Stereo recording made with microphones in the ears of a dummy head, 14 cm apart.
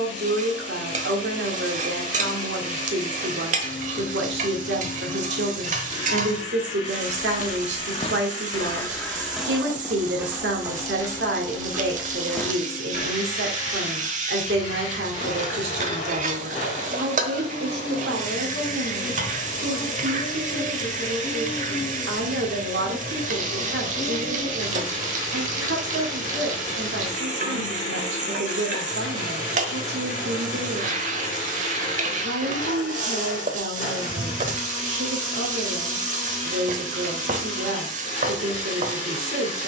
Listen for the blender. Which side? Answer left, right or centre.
left.